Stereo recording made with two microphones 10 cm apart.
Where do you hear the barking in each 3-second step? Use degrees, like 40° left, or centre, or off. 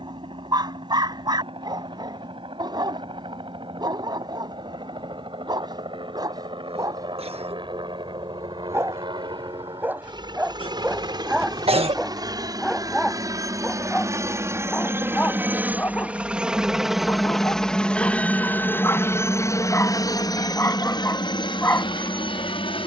40° right, 40° right, 30° right, 10° right, 10° left, 20° left, 20° left, 20° left.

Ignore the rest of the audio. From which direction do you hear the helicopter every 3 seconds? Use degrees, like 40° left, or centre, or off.
60° right, 60° right, 50° right, 50° right, 30° right, 10° right, 30° left, 50° left.